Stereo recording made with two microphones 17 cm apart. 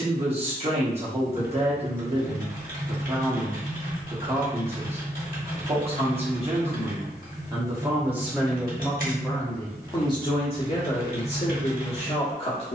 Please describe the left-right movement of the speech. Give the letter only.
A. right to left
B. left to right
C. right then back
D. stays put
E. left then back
A.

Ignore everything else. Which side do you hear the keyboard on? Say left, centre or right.
right.